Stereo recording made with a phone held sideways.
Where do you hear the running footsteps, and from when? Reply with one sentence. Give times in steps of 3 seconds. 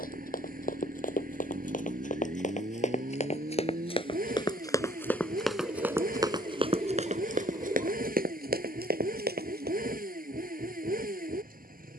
You can hear the running footsteps on the left from 0 s and on the right from 6 s.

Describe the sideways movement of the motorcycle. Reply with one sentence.
You can hear the motorcycle stay in one place.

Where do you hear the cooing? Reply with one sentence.
You can hear the cooing on the right.